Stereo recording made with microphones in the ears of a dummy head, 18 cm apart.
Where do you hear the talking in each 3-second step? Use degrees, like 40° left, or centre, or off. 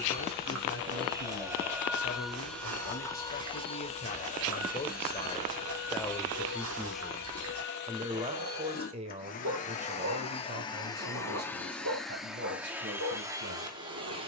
60° left, 30° left, 10° right, 40° right, 60° right.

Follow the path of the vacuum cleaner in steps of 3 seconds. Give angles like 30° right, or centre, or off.
10° right, 40° left, 60° left, 20° left, 10° right.